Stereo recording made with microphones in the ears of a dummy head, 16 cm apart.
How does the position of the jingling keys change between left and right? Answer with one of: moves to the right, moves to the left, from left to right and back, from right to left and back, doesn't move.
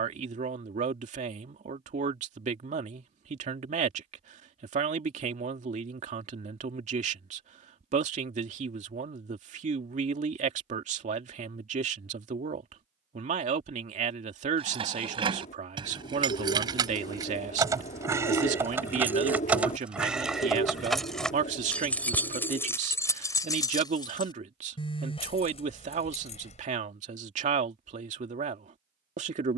moves to the left.